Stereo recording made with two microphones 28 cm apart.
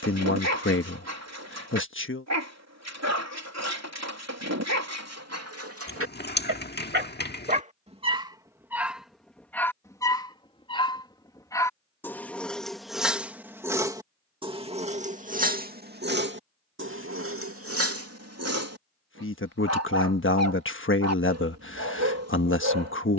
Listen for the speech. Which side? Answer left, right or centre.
left.